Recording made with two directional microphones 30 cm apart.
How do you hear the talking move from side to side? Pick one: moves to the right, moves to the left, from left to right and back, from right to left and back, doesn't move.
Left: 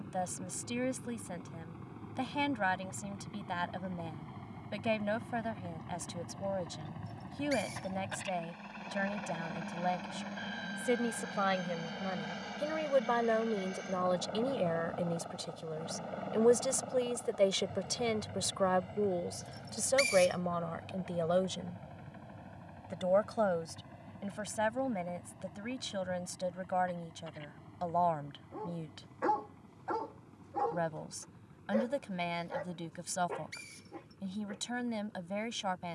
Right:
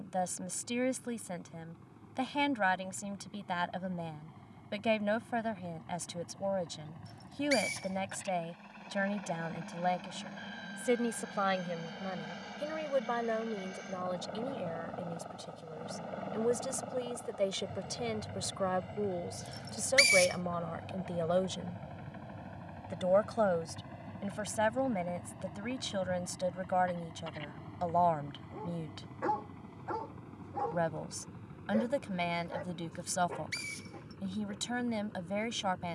from right to left and back.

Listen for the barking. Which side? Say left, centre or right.
centre.